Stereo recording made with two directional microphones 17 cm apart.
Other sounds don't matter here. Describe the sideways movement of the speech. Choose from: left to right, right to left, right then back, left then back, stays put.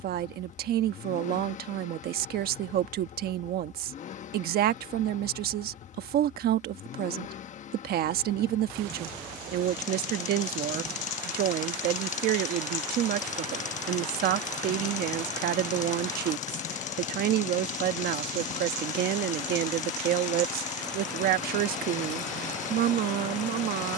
stays put.